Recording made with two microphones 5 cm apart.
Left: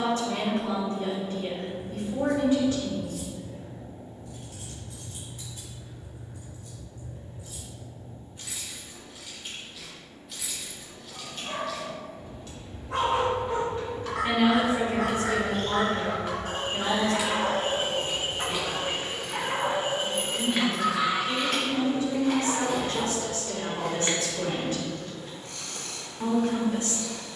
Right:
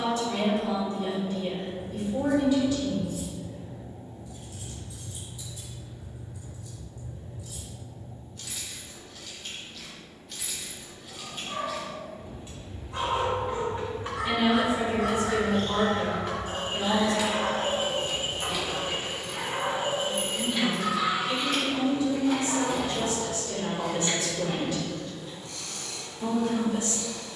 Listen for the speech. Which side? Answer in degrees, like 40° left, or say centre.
40° left.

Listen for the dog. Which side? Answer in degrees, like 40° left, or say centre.
80° left.